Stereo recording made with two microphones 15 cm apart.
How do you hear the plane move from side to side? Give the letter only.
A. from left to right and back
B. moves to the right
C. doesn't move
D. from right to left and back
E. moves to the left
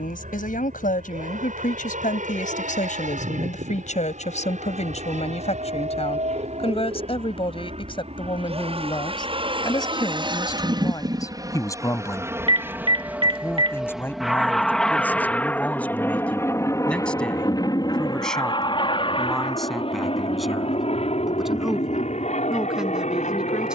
E.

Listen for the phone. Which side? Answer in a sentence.
You can hear the phone on the right.